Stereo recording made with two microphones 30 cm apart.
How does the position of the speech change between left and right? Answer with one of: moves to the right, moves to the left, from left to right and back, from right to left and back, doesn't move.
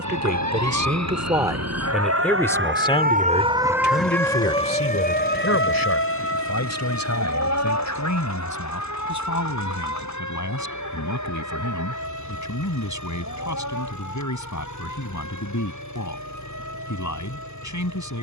moves to the left.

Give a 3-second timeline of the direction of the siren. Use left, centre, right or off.
right, centre, left, left, left, left.